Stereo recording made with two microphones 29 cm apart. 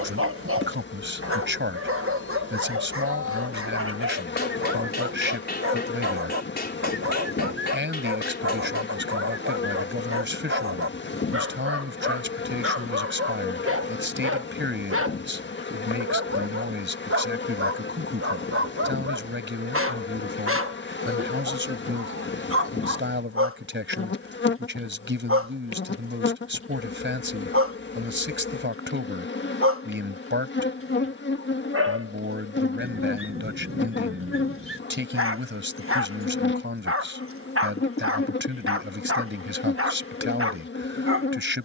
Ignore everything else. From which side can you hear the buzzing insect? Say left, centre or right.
left.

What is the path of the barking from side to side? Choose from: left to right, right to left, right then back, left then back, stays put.
stays put.